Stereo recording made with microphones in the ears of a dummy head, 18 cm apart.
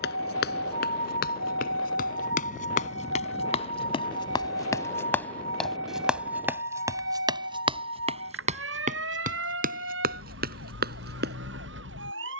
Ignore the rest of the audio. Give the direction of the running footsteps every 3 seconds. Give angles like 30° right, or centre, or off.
50° left, 20° left, 20° right, 50° right.